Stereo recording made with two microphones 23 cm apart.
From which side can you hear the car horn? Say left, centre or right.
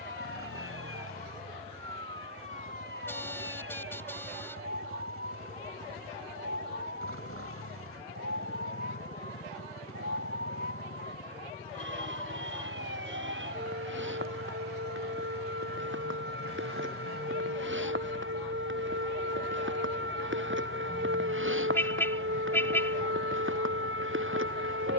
centre.